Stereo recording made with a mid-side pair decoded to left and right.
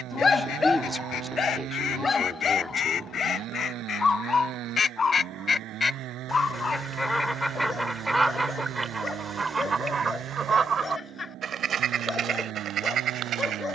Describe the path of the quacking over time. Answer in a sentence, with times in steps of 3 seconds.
In this clip you hear the quacking on the left from 0 s, in the centre from 6 s and on the right from 9 s.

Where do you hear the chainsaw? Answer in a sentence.
In this clip you hear the chainsaw on the right.